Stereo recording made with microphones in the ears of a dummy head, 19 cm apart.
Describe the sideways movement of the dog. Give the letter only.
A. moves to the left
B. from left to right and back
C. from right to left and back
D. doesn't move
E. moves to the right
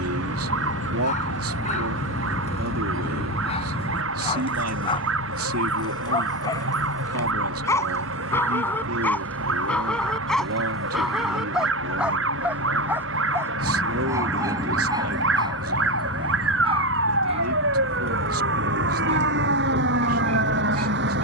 E.